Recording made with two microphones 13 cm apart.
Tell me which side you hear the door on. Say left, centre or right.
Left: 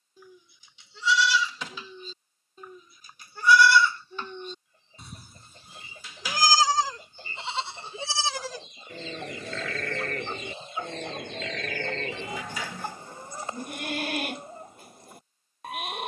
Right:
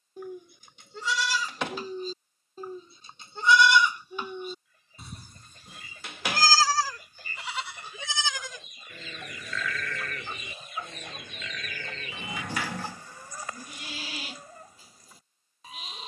right.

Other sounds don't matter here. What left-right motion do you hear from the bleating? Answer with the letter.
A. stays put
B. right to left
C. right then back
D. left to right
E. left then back
B.